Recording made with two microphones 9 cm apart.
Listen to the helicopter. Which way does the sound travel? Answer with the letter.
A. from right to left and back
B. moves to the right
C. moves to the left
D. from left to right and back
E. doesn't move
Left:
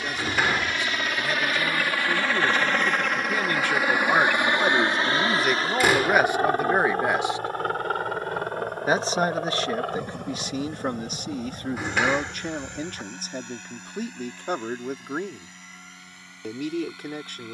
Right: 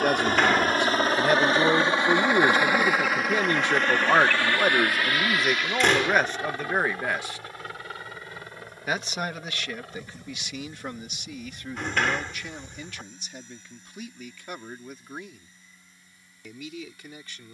C.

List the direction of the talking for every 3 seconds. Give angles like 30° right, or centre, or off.
40° right, 10° right, 20° left, 40° left, 50° left, 50° left.